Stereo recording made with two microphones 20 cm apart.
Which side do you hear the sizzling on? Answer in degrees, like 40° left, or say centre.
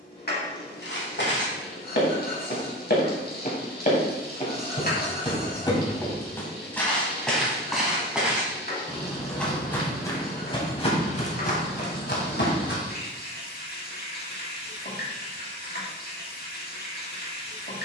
50° left.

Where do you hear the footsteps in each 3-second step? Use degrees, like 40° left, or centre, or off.
60° left, 30° left, centre, 20° left, 60° left, off.